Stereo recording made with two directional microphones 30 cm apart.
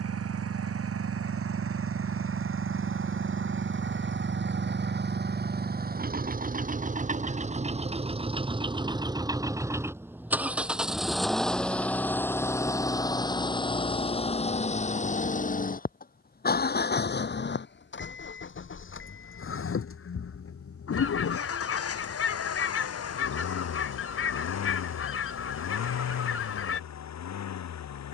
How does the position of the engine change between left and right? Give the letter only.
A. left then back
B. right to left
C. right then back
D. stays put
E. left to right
B.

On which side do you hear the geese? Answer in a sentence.
In this clip you hear the geese on the left.